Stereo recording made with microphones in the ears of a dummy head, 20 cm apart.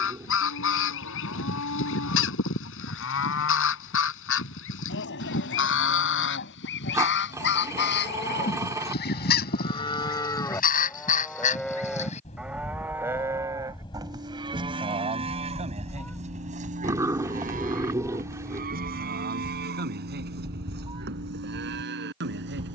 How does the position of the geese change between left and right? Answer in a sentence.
You can hear the geese travel towards the right.